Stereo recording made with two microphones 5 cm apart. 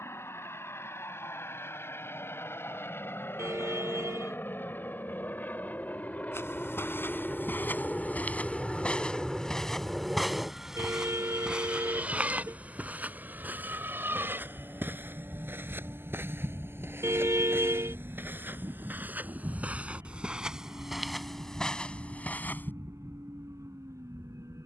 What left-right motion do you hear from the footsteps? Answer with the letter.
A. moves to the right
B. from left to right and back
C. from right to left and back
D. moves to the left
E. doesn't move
B.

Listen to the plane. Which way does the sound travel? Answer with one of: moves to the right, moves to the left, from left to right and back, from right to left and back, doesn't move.
moves to the right.